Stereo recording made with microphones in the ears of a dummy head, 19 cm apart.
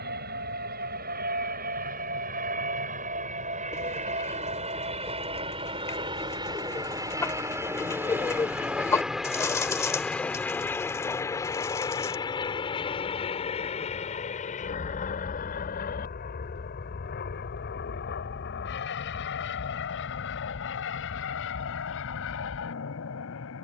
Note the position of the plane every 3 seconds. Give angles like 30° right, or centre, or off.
40° right, 30° right, 10° right, 10° left, 30° left, 40° left, 50° left, 60° left.